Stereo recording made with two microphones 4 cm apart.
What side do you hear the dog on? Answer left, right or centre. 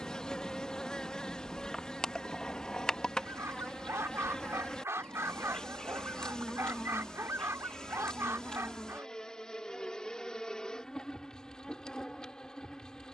right.